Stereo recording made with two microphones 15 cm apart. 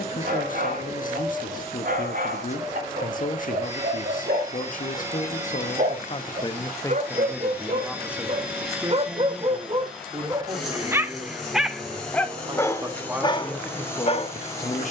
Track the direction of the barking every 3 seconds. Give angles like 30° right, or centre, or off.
70° right, 60° right, 50° right, 20° right, 30° left.